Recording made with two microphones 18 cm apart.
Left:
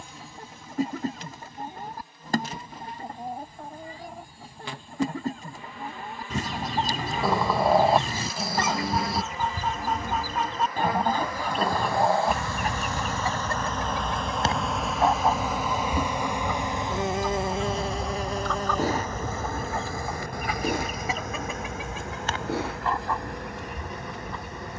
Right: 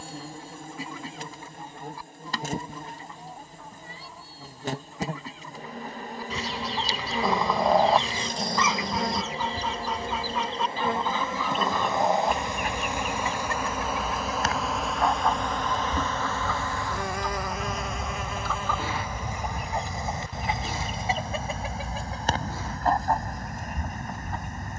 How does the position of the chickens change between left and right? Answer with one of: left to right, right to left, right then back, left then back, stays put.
left to right.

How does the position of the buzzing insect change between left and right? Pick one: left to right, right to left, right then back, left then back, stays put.
right to left.